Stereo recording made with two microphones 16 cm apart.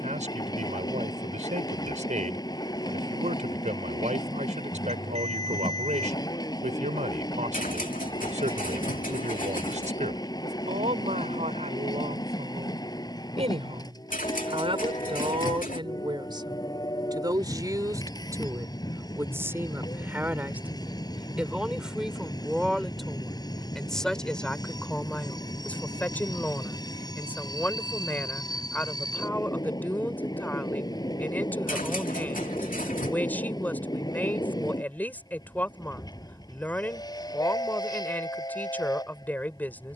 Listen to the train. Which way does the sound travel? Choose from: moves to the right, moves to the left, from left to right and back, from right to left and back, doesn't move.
doesn't move.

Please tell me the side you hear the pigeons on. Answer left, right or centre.
left.